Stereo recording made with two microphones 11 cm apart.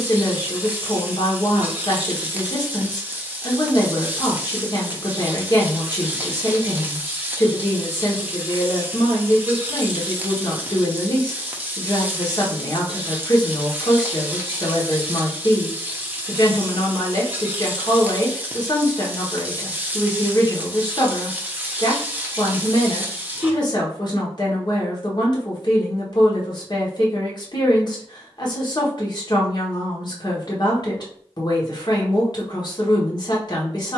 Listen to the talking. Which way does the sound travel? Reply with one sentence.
You can hear the talking stay put.